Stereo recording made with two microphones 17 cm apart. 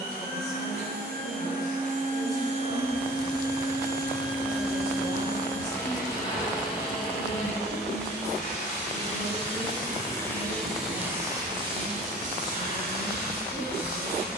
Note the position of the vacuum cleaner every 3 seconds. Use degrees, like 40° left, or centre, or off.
50° right, 10° right, 30° left, centre, 60° right.